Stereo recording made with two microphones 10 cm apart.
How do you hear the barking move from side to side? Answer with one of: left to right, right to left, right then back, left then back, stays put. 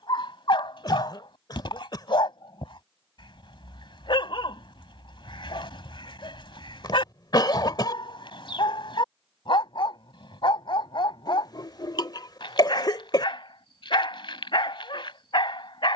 stays put.